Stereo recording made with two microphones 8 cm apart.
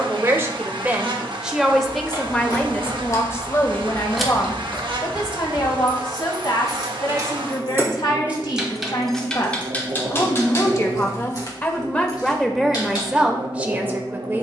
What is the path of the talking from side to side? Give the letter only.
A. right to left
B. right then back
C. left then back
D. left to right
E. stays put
C.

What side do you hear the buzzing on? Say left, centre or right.
right.